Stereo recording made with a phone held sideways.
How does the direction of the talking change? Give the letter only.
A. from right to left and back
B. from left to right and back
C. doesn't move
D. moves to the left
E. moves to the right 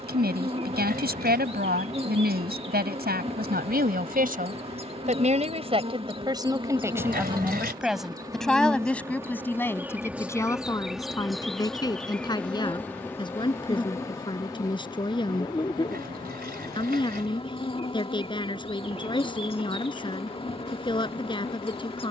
D.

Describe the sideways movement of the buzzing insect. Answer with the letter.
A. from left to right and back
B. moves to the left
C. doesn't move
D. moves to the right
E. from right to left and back
B.